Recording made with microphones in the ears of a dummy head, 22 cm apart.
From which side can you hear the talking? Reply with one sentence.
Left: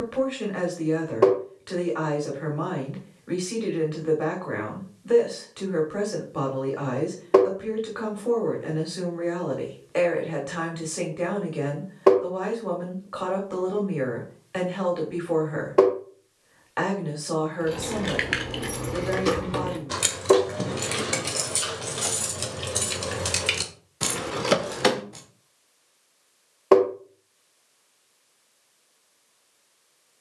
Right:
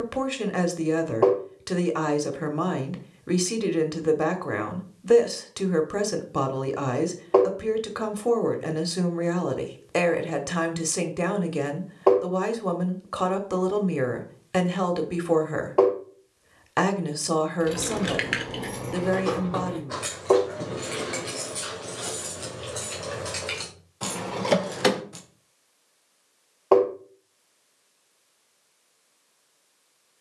You can hear the talking on the right.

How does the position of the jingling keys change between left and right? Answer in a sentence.
In this clip you hear the jingling keys go left and come back.